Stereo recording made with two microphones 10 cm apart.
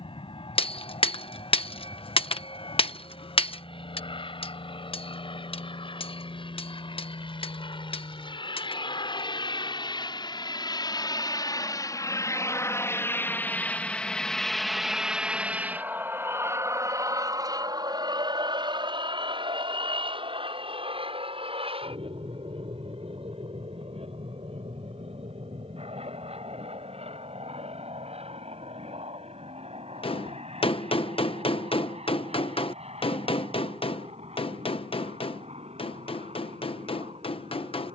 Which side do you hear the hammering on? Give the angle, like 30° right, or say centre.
70° left.